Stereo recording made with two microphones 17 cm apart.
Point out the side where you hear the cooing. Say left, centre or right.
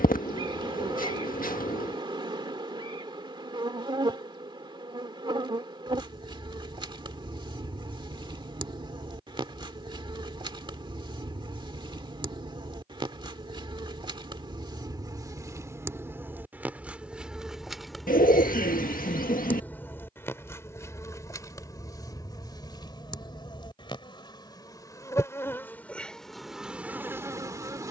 left.